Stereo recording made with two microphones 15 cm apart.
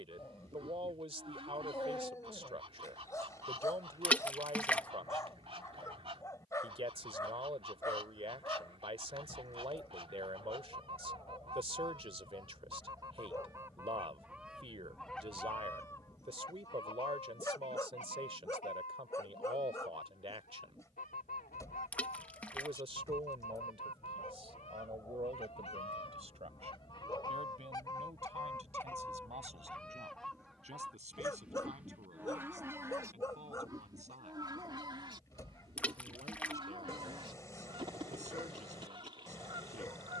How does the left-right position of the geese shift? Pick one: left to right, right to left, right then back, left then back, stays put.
left then back.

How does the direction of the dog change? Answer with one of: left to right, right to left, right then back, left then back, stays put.
stays put.